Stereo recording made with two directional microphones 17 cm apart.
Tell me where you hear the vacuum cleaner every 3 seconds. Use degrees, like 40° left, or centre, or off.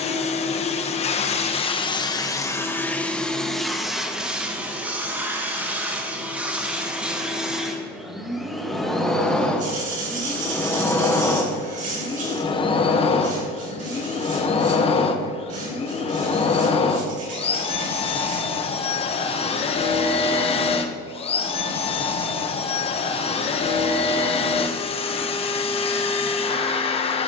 30° left, centre, centre, 10° left, 30° left, 40° left, 40° left, 40° left, 40° left.